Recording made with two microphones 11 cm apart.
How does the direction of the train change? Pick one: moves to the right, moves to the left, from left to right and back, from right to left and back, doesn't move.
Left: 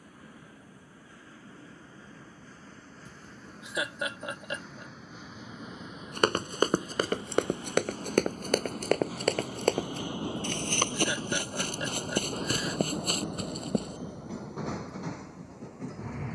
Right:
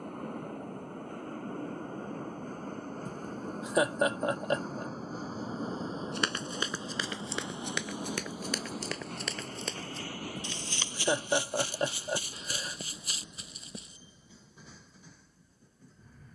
moves to the left.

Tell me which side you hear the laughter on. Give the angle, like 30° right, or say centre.
40° right.